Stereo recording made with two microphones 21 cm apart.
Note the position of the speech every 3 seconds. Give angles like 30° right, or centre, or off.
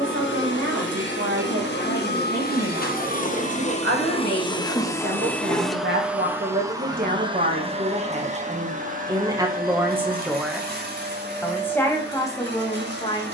80° right, 60° right, 40° right, 10° right, 20° left.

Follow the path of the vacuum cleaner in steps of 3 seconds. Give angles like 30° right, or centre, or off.
60° left, 20° left, 20° right, 50° right, 60° right.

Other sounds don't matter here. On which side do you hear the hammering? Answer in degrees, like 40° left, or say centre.
10° right.